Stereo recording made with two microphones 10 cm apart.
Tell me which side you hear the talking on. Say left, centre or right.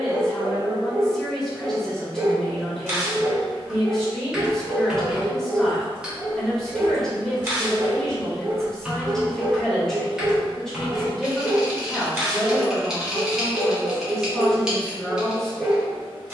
centre.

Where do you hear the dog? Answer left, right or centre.
right.